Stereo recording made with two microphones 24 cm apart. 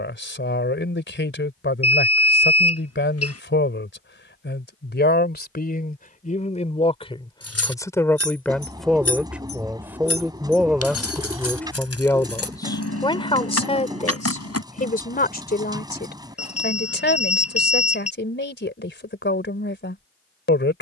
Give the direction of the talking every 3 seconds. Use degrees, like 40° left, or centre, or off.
50° left, 50° left, 20° left, centre, 20° left, 40° left, 50° left.